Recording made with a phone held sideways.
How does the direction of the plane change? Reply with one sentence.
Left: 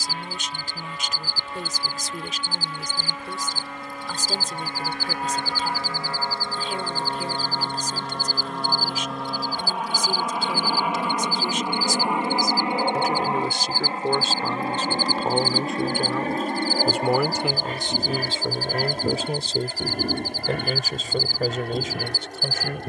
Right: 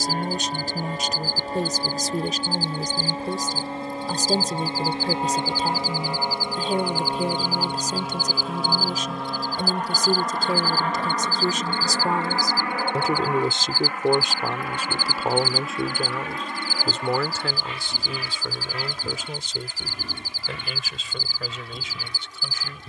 You can hear the plane move from right to left.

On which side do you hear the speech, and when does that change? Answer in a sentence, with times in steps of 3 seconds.
In this clip you hear the speech on the right from 0 s, in the centre from 15 s and on the left from 18 s.